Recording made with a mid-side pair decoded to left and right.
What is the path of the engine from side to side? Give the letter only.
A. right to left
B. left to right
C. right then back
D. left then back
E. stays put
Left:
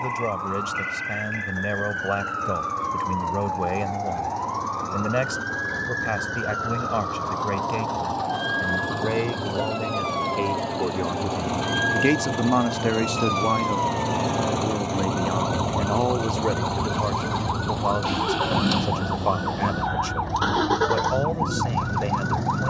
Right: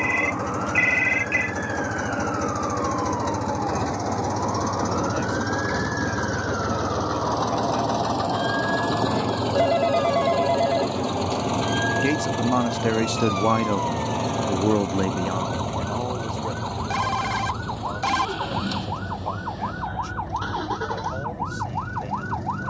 A.